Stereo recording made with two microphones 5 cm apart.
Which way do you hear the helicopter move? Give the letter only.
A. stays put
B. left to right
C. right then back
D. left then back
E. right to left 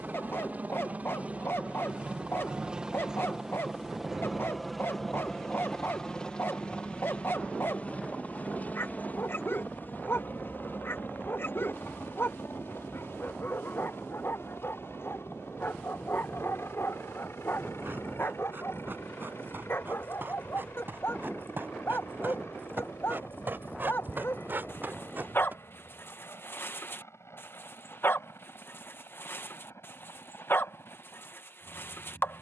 E.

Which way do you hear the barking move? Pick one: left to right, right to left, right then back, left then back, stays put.
stays put.